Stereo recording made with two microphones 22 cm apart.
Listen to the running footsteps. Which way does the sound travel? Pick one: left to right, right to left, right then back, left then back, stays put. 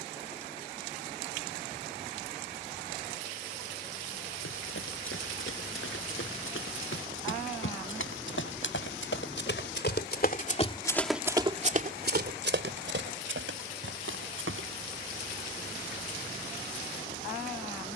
left to right.